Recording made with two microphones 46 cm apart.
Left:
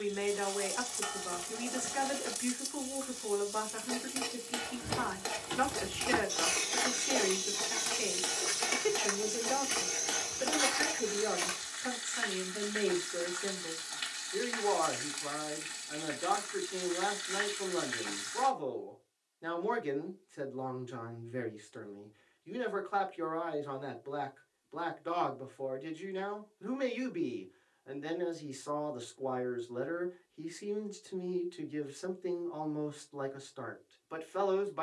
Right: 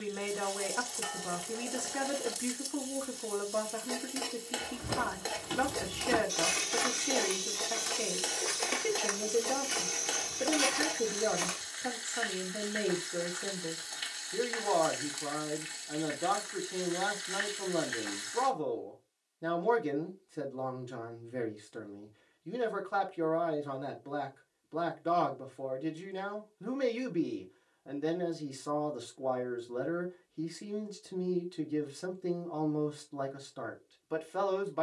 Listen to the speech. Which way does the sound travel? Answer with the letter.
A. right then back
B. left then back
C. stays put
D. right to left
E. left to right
C.